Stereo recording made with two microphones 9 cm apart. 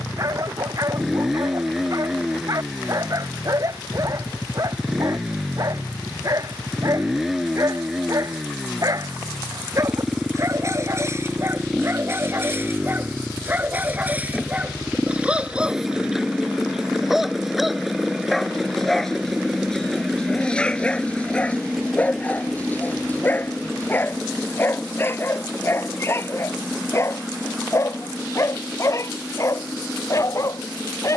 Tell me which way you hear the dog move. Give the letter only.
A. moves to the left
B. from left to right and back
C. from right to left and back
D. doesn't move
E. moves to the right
A.